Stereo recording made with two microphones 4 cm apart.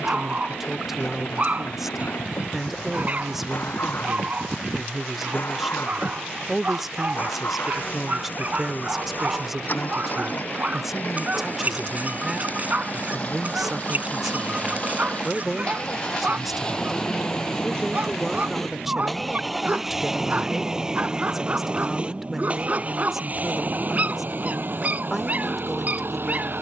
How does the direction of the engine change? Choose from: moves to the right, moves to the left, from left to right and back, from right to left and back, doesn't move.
moves to the right.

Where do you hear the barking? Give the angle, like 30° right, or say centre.
40° right.